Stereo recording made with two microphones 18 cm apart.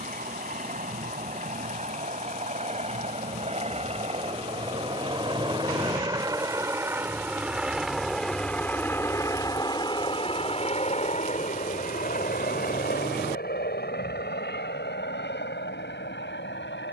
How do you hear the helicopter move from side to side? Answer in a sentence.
In this clip you hear the helicopter move from right to left.